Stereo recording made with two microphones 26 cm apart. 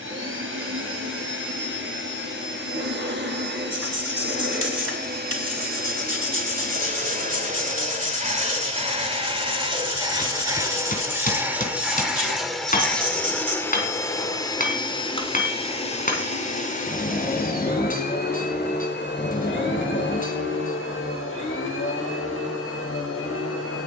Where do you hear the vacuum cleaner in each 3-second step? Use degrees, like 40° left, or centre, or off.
50° right, 40° right, 30° right, 10° right, 10° left, 30° left, 50° left, 60° left.